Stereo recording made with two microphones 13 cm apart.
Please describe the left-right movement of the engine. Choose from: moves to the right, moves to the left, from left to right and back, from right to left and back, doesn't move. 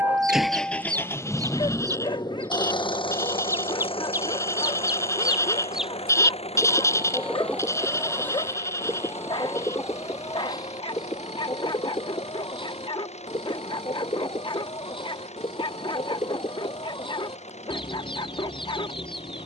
moves to the left.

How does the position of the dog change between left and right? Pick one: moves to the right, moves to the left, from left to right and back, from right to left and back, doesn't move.
doesn't move.